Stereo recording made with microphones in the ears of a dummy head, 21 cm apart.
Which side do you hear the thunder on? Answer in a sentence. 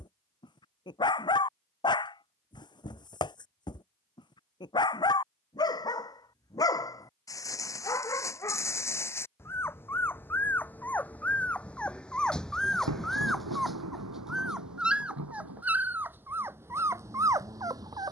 In this clip you hear the thunder on the right.